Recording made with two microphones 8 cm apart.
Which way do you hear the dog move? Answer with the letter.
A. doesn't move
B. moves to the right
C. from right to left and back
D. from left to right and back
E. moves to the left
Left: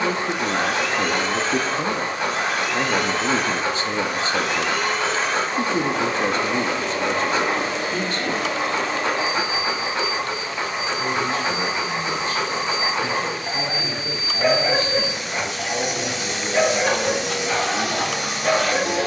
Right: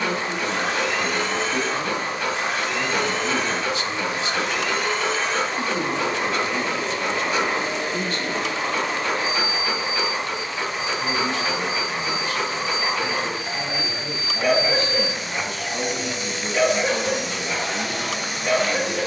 A.